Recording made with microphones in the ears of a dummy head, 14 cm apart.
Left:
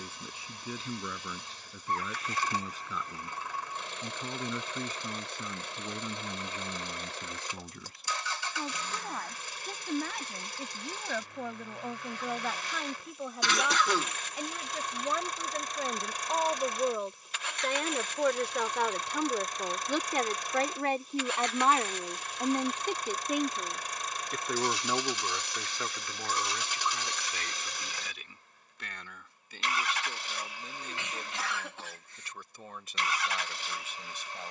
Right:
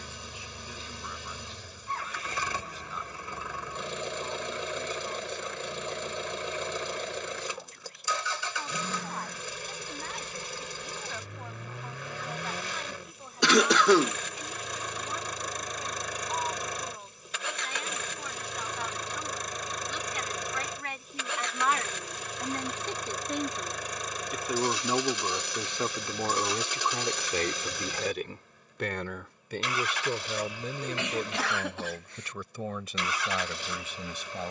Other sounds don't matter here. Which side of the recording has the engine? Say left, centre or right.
right.